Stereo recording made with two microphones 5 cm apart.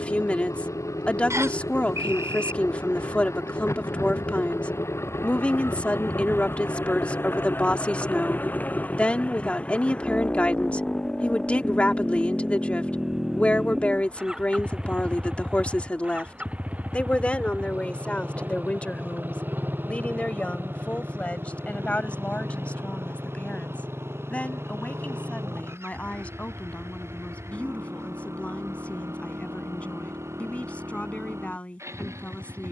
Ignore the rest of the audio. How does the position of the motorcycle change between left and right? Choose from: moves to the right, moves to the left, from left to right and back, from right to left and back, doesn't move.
moves to the right.